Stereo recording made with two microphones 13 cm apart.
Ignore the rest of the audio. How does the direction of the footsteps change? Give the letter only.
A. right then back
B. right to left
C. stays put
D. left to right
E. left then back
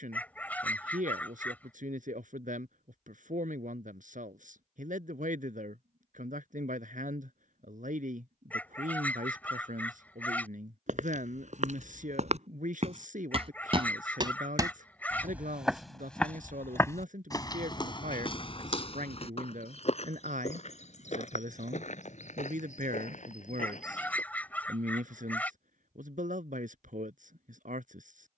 B.